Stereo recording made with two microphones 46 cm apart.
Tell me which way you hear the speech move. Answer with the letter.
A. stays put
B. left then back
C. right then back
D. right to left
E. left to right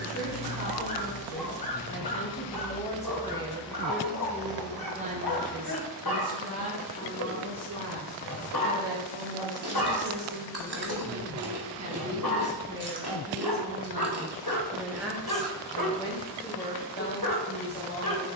C.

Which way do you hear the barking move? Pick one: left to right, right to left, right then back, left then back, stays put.
stays put.